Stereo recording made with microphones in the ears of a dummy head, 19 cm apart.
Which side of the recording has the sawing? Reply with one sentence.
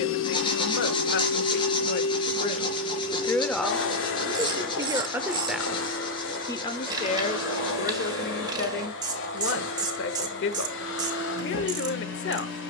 In this clip you hear the sawing on the left.